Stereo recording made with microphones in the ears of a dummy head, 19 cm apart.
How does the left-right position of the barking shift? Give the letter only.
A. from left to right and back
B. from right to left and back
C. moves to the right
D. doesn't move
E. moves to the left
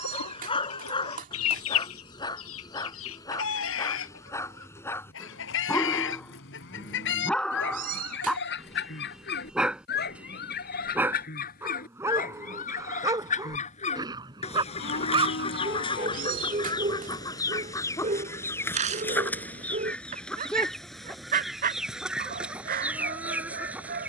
C.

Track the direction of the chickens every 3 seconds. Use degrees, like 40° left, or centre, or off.
70° left, 60° left, 60° left, 50° left, 30° left, 20° left, 10° left, centre.